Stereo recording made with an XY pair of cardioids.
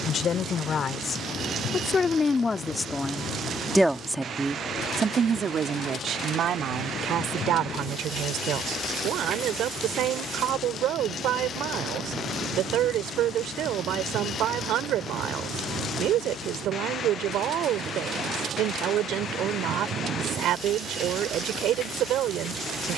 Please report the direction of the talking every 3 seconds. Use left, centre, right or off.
left, right, right, right, right, right, right, right.